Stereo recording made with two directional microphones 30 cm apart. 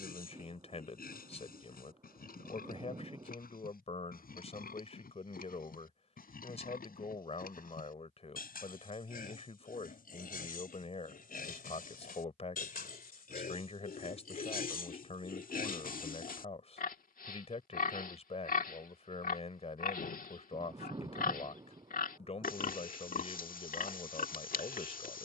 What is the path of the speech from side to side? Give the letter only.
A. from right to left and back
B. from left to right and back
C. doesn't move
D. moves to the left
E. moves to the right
C.